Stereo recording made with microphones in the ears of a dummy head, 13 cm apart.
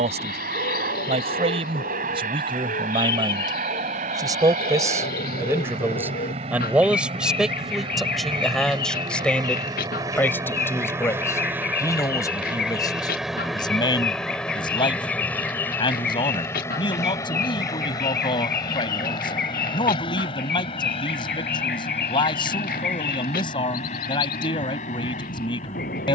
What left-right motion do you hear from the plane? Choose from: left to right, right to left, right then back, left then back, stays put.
right to left.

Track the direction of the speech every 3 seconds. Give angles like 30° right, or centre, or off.
40° right, 30° right, centre, 20° left, 30° left, 40° left, 40° left, 40° left, 40° left.